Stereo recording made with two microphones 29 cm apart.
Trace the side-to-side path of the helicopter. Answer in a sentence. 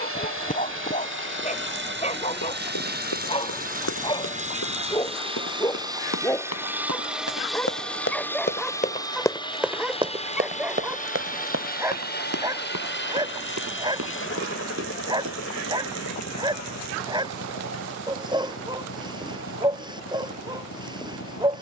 In this clip you hear the helicopter move from right to left.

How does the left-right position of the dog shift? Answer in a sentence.
You can hear the dog travel towards the right.